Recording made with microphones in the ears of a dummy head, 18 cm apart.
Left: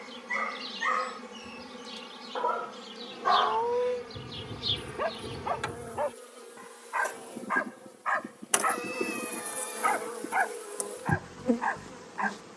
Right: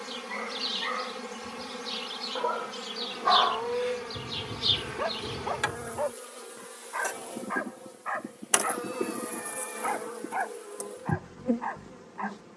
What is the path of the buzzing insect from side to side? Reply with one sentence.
You can hear the buzzing insect move from right to left.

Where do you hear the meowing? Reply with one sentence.
In this clip you hear the meowing on the left.